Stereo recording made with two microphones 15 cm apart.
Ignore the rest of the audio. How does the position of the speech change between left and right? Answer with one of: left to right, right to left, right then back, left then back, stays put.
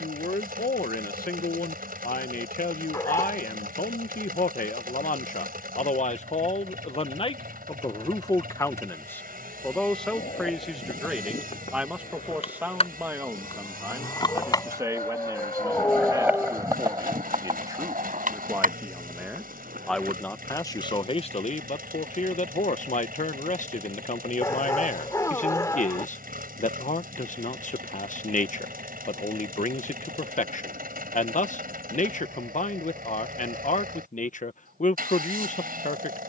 right then back.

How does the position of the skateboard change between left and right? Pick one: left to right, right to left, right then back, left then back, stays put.
left to right.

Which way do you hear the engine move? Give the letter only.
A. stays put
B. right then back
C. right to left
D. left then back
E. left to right
A.